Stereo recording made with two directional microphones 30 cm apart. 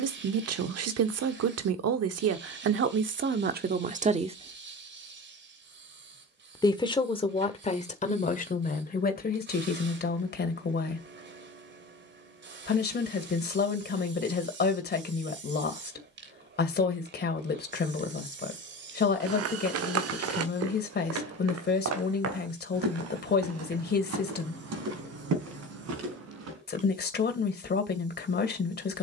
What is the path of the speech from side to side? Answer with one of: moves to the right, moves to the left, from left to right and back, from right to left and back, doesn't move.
moves to the left.